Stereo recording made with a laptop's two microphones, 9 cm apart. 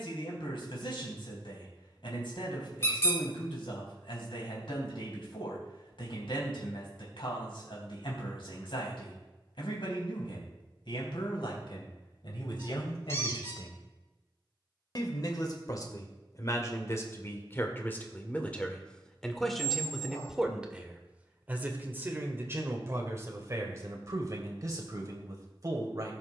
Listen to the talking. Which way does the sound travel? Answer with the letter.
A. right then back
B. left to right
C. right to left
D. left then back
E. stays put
B.